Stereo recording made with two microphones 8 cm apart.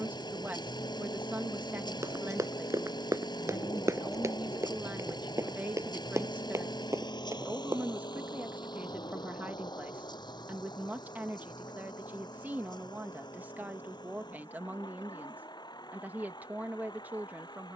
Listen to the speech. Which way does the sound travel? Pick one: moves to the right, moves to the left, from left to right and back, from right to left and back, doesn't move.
doesn't move.